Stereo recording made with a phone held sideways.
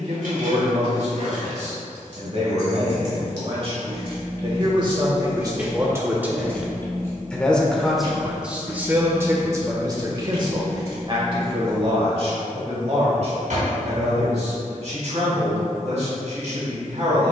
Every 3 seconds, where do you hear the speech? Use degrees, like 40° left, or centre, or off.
50° right, 40° right, 10° right, 30° right, 50° right, 60° right.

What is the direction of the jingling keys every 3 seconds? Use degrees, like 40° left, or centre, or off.
70° right, 30° right, 30° left, 50° left, off, off.